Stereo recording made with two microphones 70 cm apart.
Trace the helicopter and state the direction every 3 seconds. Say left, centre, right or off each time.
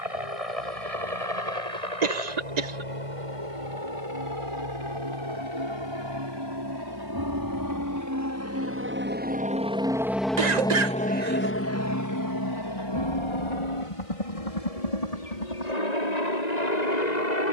right, right, right, centre, left, left.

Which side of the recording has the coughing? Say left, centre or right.
right.